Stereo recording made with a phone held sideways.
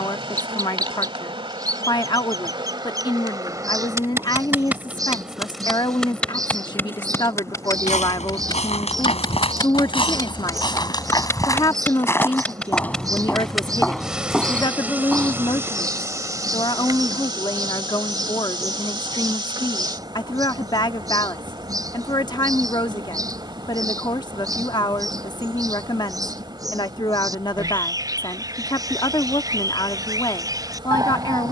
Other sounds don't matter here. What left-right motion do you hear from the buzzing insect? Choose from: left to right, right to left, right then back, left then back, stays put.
left then back.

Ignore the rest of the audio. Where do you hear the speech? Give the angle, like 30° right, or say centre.
30° left.